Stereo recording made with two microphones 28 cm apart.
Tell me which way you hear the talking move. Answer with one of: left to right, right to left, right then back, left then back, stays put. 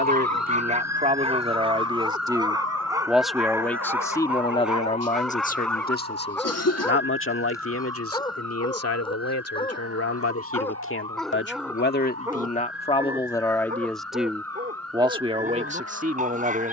left then back.